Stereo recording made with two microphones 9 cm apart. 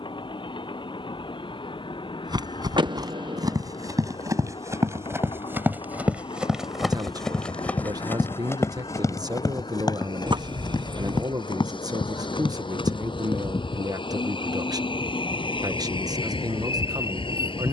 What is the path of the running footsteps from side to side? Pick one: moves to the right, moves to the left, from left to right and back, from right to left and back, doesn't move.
moves to the left.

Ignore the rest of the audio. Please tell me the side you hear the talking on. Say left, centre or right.
right.